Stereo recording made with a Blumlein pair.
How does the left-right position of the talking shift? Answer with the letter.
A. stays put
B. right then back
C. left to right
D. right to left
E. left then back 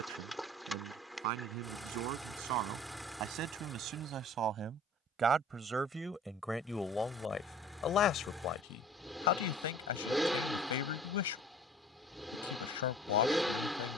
D.